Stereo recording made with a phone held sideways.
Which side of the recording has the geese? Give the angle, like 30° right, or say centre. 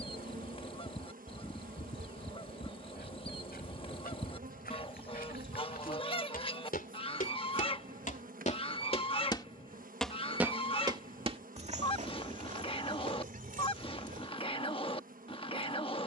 40° left.